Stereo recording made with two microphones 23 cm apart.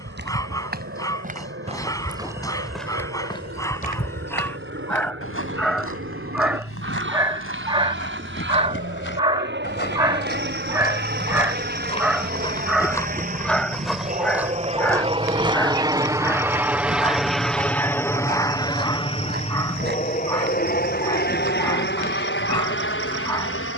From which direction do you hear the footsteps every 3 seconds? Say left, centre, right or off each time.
right, left, left, left, centre, right, right, right.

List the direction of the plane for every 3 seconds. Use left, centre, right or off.
right, right, right, right, right, centre, left, left.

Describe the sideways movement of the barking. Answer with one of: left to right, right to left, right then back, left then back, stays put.
right then back.